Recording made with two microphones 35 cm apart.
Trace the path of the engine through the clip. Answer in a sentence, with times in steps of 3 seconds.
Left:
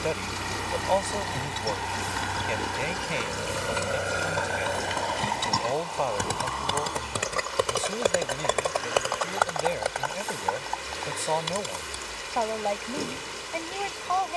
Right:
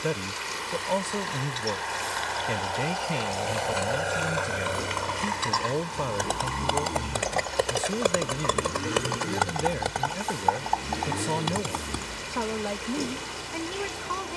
You can hear the engine on the left from 0 s, in the centre from 3 s and on the right from 6 s.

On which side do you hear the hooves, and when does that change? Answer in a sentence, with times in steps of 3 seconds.
In this clip you hear the hooves on the left from 0 s, in the centre from 6 s, on the right from 9 s and not at all from 12 s.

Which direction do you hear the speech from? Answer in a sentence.
You can hear the speech on the right.